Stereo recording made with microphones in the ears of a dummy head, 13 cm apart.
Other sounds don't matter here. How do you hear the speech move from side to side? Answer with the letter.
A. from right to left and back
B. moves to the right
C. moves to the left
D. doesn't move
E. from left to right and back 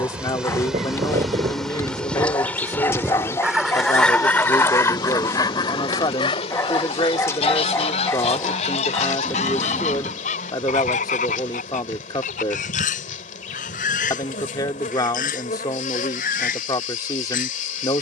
D.